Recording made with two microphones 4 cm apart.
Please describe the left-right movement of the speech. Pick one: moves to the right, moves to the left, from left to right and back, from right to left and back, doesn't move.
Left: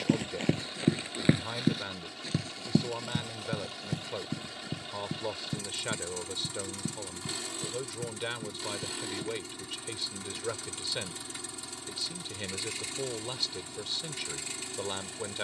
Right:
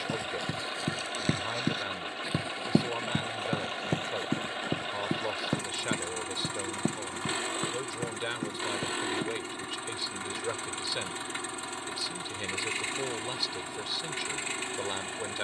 doesn't move.